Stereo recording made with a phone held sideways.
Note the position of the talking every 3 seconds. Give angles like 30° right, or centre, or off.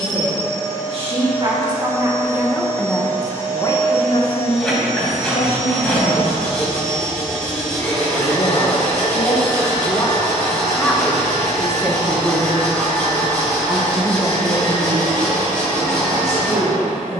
30° right, 40° left, 50° left, 10° left, 30° right, 50° right.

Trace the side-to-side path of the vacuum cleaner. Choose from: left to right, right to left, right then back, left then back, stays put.
stays put.